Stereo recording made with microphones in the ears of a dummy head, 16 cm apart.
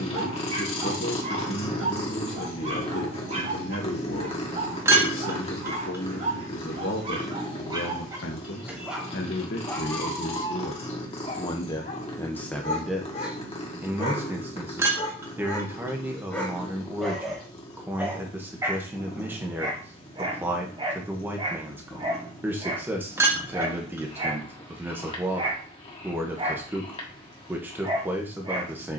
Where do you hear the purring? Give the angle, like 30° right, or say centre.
30° left.